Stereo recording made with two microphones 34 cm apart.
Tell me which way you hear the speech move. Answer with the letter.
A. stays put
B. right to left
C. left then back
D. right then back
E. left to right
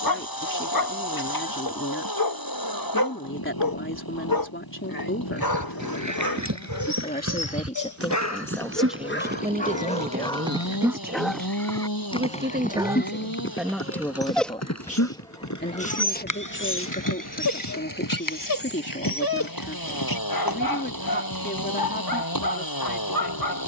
D.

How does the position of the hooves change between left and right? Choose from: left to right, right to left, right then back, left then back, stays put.
right to left.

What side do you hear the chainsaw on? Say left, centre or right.
left.